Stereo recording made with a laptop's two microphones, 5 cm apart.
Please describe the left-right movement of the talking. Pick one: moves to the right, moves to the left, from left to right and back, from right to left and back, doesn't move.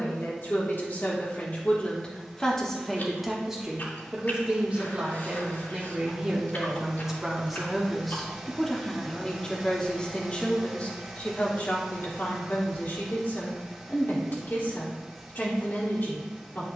from left to right and back.